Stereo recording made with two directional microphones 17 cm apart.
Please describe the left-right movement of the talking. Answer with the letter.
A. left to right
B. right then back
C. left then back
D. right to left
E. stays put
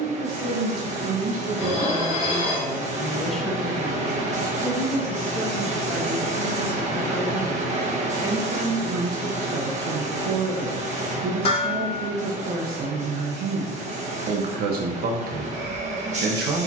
C.